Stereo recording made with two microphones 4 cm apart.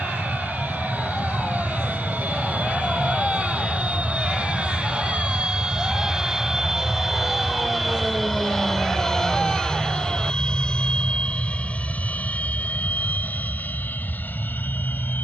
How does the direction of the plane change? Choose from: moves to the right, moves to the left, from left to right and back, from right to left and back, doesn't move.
moves to the left.